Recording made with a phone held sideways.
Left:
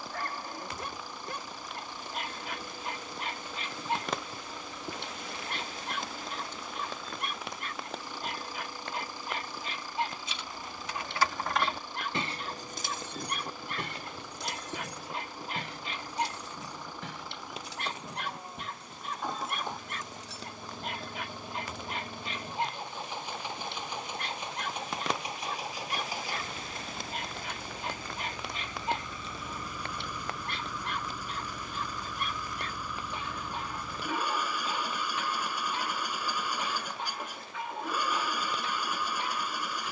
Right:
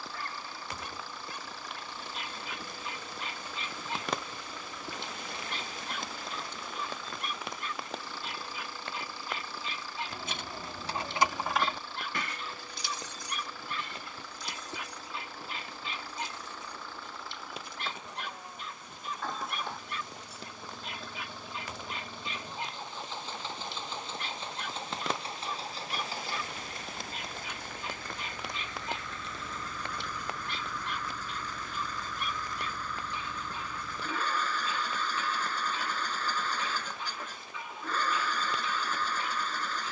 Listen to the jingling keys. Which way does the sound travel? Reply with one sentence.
In this clip you hear the jingling keys move to the left.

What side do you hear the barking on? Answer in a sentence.
In this clip you hear the barking on the left.